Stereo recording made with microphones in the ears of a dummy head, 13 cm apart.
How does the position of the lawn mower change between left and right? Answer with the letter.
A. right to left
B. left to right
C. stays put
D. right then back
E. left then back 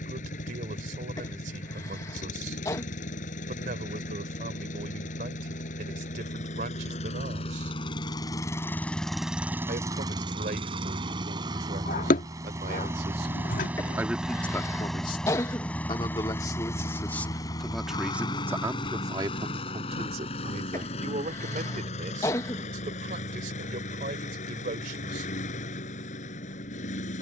D.